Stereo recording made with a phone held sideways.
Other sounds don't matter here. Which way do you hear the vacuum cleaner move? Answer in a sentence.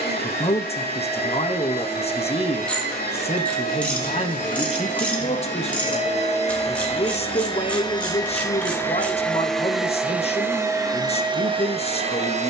You can hear the vacuum cleaner travel towards the right.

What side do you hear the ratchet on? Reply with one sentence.
In this clip you hear the ratchet in the centre.